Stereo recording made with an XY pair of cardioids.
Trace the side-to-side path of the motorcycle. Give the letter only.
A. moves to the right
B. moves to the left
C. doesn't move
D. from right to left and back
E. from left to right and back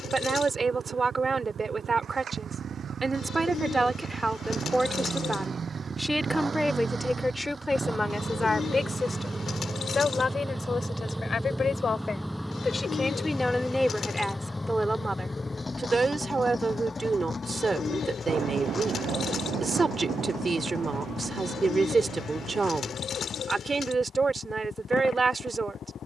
B.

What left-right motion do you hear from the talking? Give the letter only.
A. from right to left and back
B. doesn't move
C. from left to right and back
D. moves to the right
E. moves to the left
A.